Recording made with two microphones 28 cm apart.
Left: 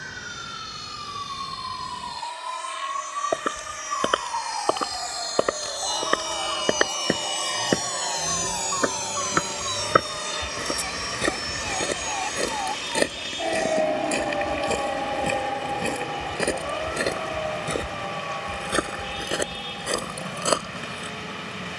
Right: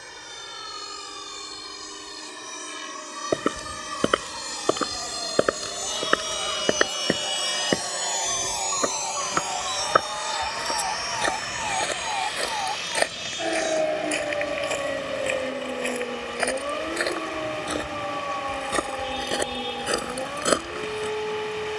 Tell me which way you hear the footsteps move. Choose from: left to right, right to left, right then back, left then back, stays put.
left then back.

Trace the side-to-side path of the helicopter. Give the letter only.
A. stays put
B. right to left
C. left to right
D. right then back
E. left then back
B.